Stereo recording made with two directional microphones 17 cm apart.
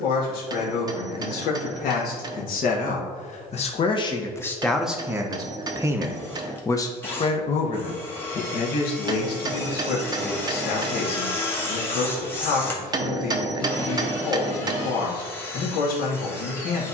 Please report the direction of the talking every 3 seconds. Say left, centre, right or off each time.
left, centre, left, left, left, left.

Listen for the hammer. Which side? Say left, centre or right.
right.